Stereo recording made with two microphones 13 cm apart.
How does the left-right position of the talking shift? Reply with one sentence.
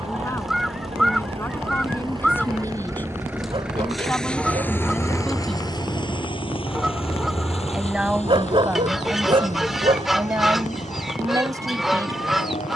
You can hear the talking travel towards the right.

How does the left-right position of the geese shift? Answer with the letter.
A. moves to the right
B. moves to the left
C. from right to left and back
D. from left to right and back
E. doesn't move
E.